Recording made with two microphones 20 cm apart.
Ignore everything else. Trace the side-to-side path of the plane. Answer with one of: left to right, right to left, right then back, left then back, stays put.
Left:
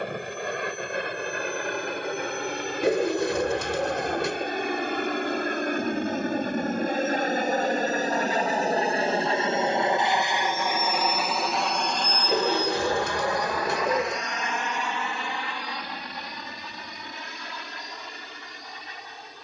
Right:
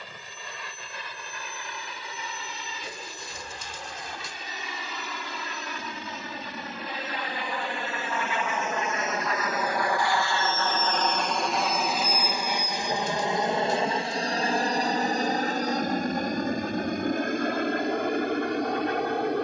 left to right.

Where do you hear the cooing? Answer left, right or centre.
left.